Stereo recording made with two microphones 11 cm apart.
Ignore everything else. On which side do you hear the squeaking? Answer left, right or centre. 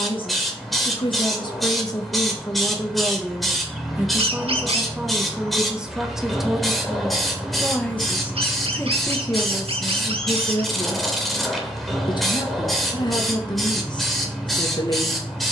right.